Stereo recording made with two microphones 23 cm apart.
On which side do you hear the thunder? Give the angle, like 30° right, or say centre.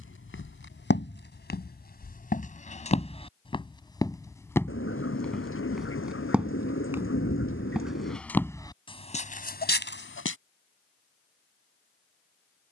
60° left.